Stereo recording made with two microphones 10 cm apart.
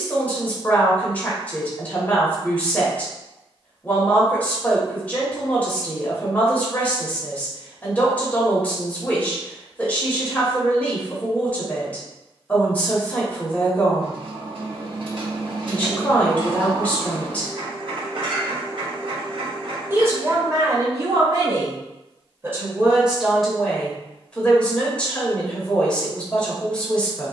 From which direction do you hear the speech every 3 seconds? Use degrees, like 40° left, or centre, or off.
20° left, 20° left, 20° left, 20° left, 20° left, 20° left, 30° right, 20° right, 10° left.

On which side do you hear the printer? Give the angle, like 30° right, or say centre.
60° right.